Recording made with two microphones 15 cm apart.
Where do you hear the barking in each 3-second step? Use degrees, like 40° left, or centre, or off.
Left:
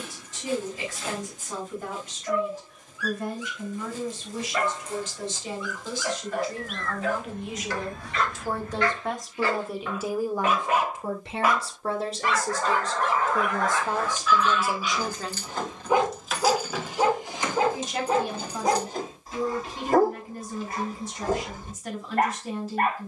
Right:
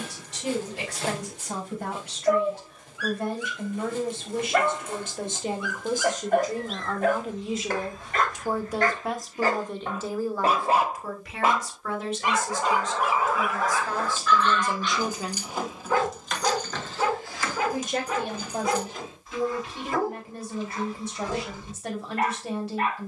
70° right, 70° right, 50° right, 30° right, centre, 20° left, 40° left, 50° left.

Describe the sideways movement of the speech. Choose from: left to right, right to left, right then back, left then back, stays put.
left then back.